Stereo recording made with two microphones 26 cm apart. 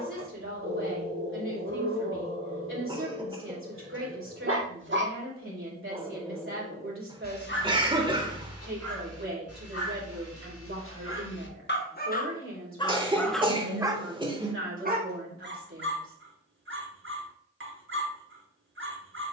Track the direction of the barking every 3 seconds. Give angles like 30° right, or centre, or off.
50° right, 50° right, 30° left, 60° left, 10° left, 50° right, 50° right.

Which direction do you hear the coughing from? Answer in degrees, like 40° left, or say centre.
20° right.